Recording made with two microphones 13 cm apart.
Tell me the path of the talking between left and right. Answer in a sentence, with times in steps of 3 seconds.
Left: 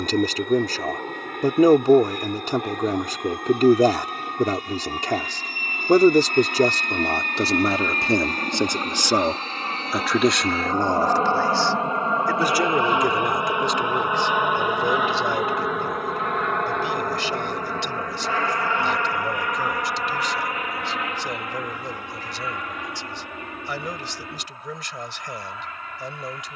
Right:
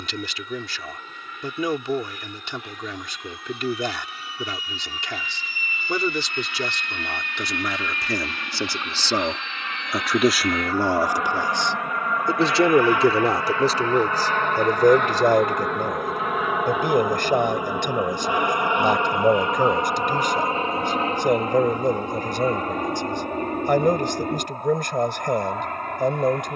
In this clip you hear the talking on the left from 0 s, in the centre from 9 s and on the right from 12 s.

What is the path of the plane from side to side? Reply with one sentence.
You can hear the plane go from the left side to the right.